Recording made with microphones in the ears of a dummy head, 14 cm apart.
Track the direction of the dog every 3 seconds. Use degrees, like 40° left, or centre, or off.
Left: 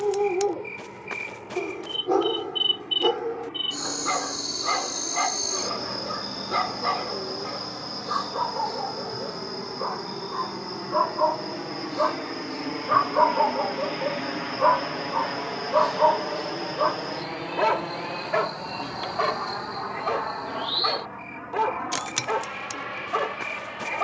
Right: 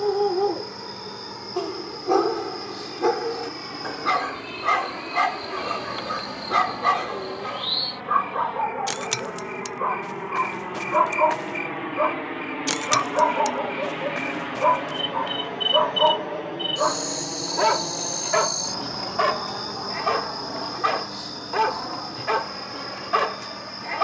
30° right, 30° right, 30° right, 20° right, 20° left, centre, 20° right, 30° right.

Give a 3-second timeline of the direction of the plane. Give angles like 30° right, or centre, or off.
70° right, 70° right, 60° right, 40° right, 10° right, 20° left, 50° left, 60° left.